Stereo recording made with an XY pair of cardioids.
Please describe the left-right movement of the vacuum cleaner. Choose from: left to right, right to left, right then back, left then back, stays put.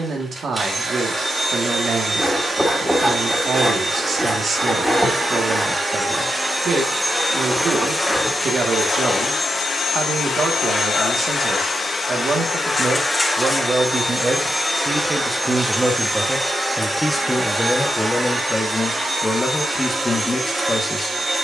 left then back.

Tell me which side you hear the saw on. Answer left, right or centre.
centre.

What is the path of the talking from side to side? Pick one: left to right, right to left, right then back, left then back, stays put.
right to left.